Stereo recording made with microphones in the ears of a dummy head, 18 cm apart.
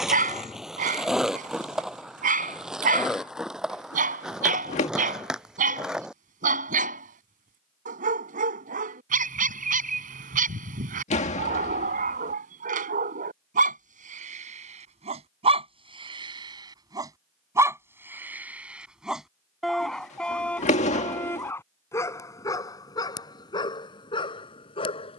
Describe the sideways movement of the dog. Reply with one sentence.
In this clip you hear the dog move to the left.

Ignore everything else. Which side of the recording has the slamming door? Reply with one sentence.
You can hear the slamming door on the left.